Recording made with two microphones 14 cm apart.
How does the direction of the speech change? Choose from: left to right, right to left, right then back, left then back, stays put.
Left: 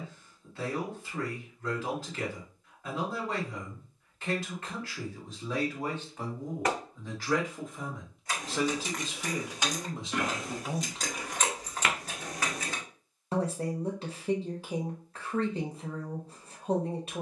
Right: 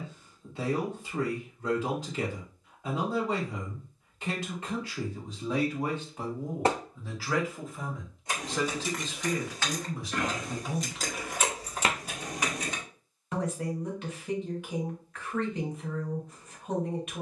right to left.